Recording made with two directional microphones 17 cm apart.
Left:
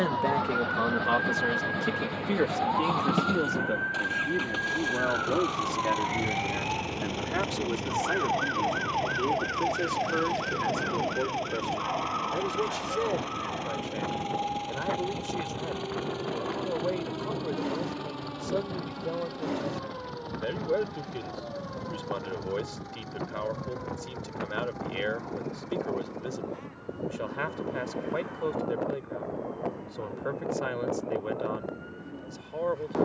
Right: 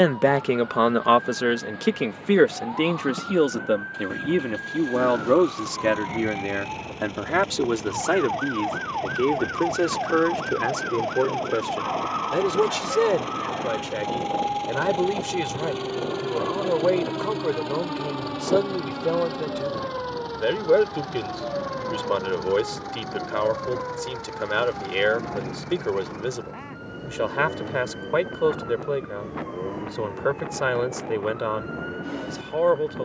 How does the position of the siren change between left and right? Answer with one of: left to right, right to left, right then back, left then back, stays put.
left to right.